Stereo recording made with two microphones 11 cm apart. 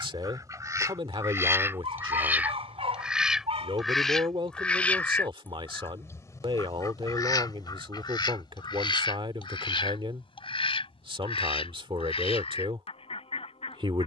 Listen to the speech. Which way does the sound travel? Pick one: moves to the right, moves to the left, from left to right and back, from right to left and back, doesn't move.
doesn't move.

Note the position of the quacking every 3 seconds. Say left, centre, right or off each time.
right, centre, left, left, left.